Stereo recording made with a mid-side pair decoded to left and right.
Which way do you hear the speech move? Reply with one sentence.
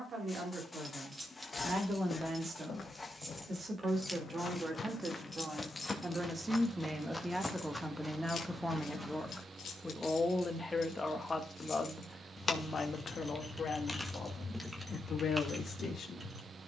In this clip you hear the speech move to the left.